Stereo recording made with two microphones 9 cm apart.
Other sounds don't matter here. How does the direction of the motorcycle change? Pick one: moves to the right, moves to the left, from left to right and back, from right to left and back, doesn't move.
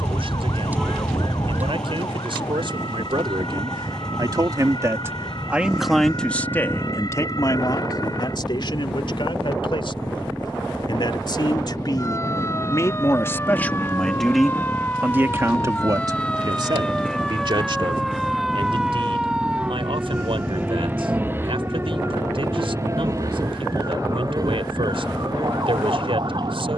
doesn't move.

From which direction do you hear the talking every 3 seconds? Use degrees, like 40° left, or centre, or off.
70° right, 40° right, 40° left, 60° left, 20° left, 40° right, 70° right, 70° right, 70° right.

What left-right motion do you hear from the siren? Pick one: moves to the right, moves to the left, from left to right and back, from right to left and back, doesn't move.
moves to the right.